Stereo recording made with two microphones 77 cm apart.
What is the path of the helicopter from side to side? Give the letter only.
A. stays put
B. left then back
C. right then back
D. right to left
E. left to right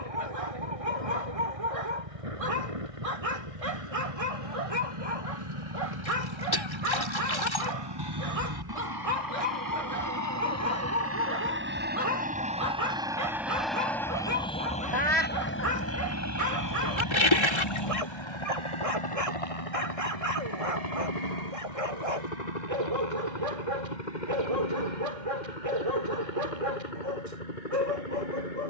D.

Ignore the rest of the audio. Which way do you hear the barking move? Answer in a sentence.
You can hear the barking stay in one place.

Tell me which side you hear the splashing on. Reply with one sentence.
In this clip you hear the splashing on the left.